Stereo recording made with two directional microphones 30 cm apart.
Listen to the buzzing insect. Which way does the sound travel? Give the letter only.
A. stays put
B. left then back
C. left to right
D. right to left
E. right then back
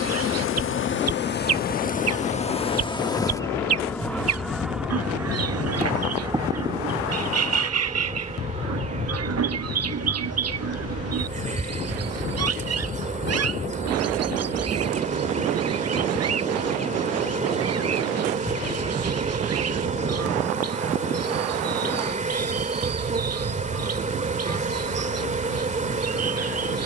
C.